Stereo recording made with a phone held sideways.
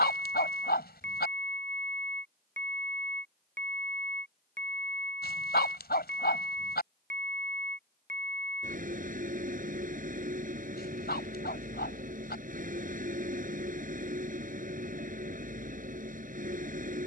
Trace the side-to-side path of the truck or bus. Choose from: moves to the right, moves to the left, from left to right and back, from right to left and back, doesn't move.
doesn't move.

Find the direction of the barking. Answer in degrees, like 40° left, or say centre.
80° left.